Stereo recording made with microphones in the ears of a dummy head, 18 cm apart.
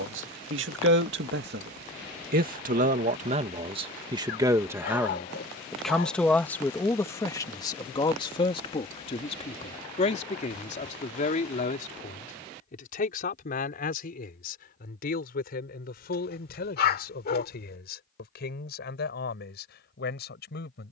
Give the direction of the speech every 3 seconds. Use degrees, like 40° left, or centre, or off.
60° right, 20° right, 20° left, 40° left, 40° left, 50° left, 50° left.